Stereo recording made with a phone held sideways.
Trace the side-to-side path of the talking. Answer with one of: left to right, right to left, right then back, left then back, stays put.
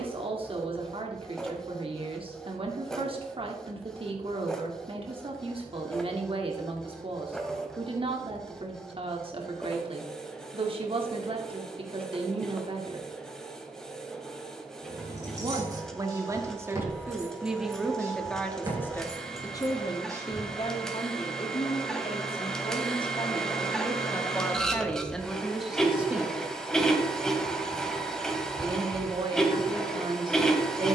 left then back.